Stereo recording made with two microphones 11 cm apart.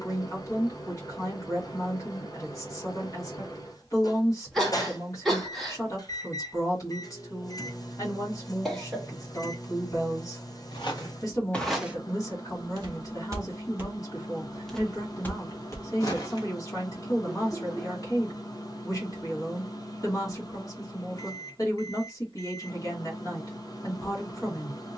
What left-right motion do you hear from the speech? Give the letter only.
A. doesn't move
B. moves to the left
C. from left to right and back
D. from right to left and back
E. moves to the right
A.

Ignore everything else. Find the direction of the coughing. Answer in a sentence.
You can hear the coughing in the centre.